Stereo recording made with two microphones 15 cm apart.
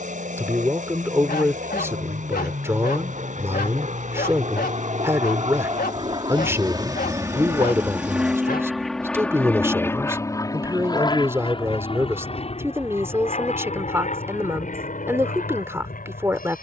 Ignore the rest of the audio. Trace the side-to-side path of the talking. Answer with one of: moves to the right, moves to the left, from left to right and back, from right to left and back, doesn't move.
doesn't move.